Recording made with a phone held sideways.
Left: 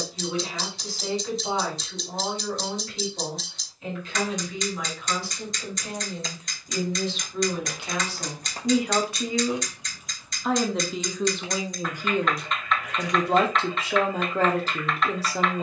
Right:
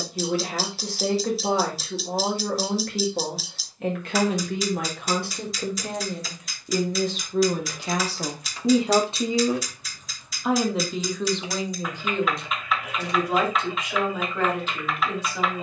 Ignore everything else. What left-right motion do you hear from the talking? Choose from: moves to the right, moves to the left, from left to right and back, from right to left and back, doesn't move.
moves to the left.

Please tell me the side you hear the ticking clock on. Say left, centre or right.
centre.